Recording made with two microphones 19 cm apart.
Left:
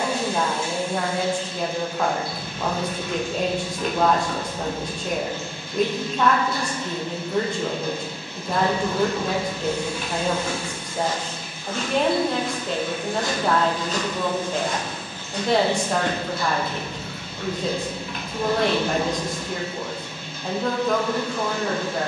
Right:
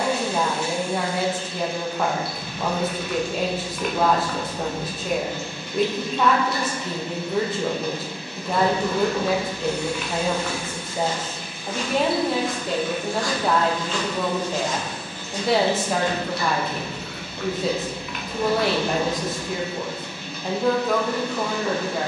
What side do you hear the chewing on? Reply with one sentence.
In this clip you hear the chewing on the left.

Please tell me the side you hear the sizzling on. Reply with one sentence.
You can hear the sizzling on the right.